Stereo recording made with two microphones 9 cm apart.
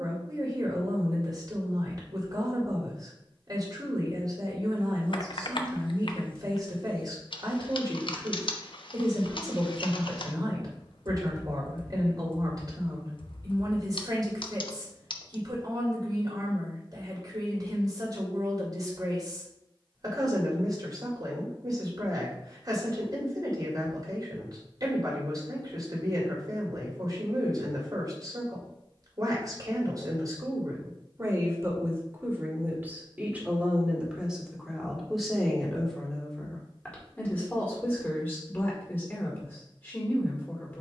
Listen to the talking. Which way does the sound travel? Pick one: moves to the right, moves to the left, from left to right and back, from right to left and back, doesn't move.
moves to the left.